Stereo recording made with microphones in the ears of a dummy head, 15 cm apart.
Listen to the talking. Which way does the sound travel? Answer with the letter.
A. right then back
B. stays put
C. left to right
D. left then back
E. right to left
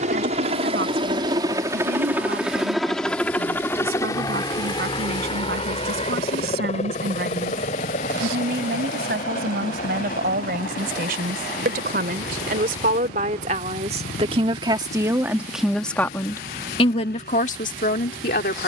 E.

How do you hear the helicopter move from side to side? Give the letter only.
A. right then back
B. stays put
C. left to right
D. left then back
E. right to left
E.